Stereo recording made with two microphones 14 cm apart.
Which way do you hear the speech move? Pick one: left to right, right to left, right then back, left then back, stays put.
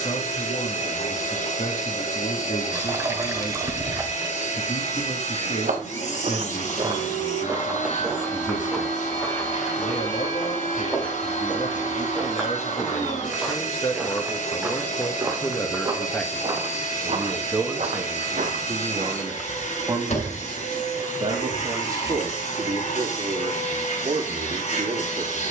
left to right.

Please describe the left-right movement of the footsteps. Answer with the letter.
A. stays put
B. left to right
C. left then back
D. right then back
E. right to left
C.